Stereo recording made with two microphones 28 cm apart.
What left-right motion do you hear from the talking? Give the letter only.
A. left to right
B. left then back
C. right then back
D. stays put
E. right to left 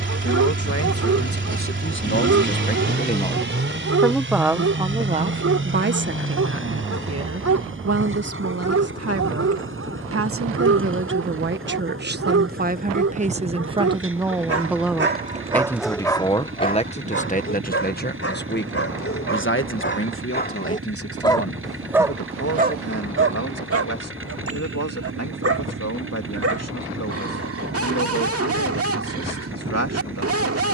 C.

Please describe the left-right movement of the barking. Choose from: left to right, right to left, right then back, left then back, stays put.
left then back.